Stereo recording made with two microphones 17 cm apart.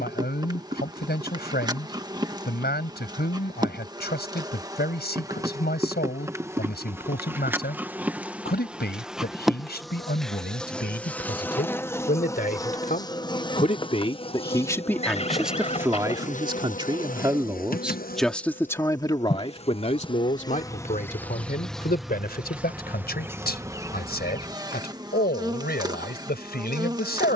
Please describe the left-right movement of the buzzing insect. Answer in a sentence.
You can hear the buzzing insect go left and come back.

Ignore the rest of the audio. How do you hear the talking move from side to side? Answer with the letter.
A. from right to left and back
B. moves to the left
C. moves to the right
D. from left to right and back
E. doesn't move
D.